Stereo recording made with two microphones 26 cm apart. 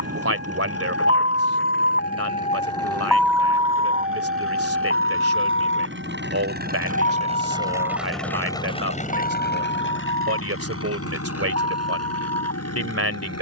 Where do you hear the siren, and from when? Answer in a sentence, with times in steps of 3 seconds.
You can hear the siren on the left from 0 s and on the right from 3 s.